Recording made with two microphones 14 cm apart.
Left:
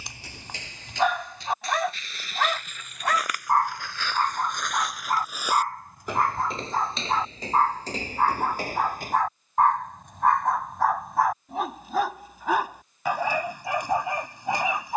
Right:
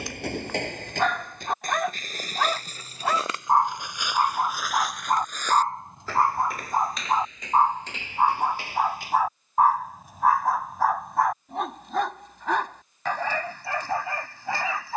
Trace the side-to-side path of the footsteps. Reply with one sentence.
You can hear the footsteps go from the right side to the left.